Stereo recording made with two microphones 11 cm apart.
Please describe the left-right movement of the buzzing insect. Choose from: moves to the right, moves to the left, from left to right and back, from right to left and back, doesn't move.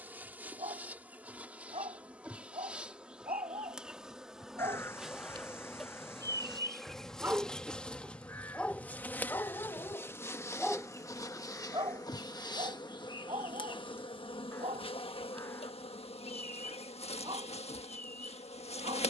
moves to the left.